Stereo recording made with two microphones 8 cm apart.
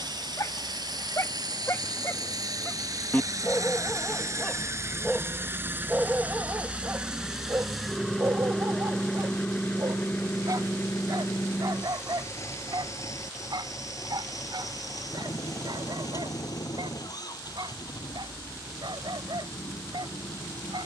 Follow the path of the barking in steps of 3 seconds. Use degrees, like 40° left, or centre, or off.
40° left, centre, 30° right, 60° right, 70° right, 70° right, 80° right.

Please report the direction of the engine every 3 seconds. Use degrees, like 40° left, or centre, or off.
60° right, 40° right, 10° right, 30° left, 40° left, 50° left, 60° left.